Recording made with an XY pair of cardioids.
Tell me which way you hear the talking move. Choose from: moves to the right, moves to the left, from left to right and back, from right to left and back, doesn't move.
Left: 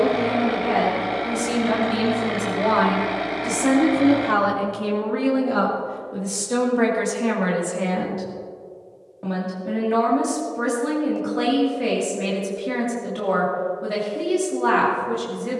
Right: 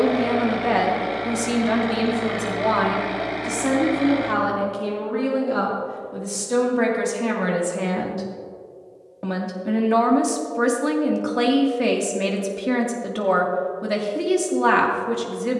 from right to left and back.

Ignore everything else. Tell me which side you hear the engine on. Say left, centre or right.
centre.